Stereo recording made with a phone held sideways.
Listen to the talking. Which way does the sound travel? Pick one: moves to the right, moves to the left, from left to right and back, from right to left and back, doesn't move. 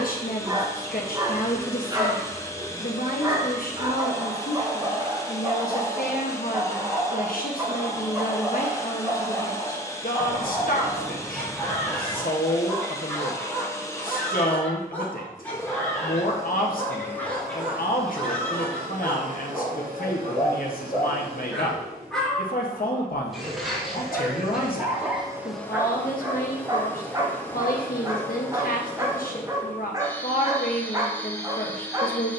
doesn't move.